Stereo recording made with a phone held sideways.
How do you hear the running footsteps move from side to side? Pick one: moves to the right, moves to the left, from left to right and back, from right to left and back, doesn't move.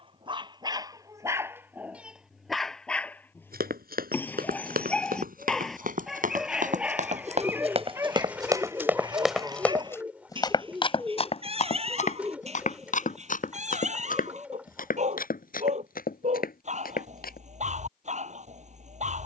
moves to the left.